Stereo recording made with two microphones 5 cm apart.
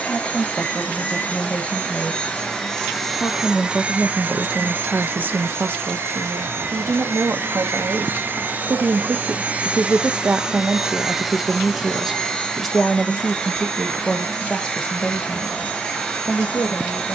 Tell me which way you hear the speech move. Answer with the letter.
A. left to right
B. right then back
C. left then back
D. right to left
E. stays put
B.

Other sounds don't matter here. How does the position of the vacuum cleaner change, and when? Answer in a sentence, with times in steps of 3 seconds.
In this clip you hear the vacuum cleaner on the left from 0 s, on the right from 3 s, in the centre from 9 s and on the left from 12 s.